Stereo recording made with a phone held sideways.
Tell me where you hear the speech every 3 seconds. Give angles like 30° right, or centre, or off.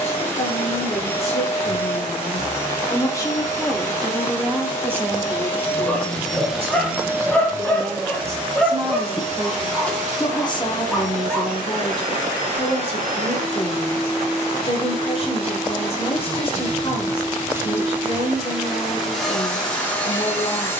40° left, 10° right, 40° right, 30° left, 40° left, 40° left, 40° left.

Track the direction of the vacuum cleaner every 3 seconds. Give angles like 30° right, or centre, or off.
20° left, 20° left, 20° right, 60° right, 50° right, 30° right, centre.